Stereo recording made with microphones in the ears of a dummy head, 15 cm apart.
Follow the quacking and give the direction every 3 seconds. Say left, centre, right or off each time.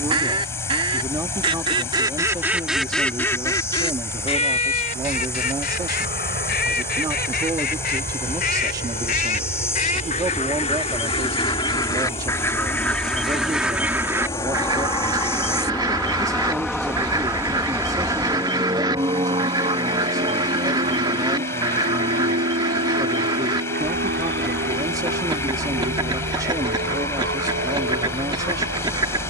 right, left, left, left, centre, right, right, right, right, right.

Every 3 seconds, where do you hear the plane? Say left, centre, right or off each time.
left, left, left, left, left, centre, right, right, right, right.